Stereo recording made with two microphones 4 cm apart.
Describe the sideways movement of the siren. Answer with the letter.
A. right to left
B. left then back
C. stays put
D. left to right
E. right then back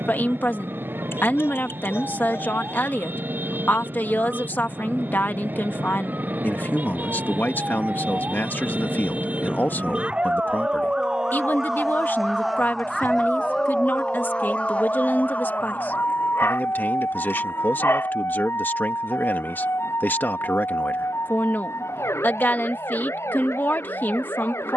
A.